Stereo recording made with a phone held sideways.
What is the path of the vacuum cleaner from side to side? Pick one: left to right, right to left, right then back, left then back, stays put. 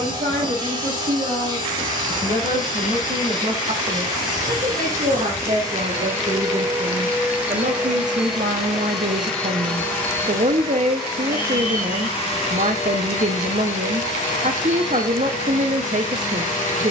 right to left.